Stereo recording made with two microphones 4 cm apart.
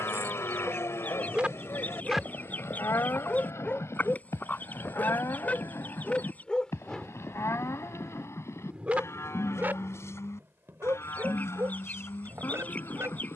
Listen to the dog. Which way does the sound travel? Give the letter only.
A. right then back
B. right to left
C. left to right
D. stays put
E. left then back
E.